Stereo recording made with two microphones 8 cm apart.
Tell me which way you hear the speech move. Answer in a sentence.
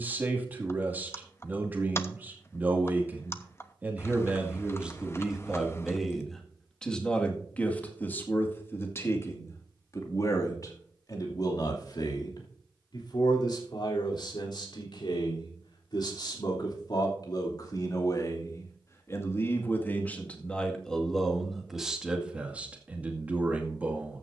In this clip you hear the speech go left and come back.